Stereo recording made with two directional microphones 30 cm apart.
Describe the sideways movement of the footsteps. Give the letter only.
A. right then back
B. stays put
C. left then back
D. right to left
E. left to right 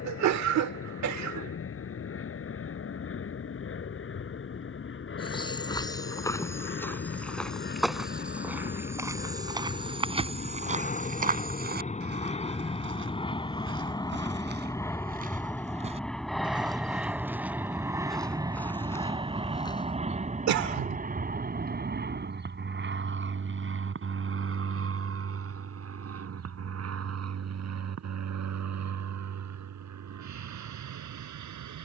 A.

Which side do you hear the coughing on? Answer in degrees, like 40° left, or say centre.
60° right.